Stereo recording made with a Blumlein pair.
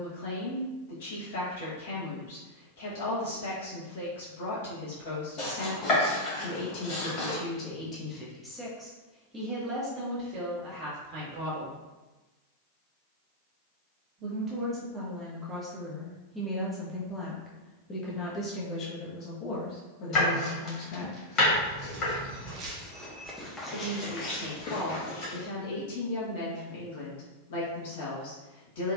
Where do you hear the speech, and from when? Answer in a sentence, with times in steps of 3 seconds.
You can hear the speech on the left from 0 s, on the right from 9 s, in the centre from 15 s and on the left from 18 s.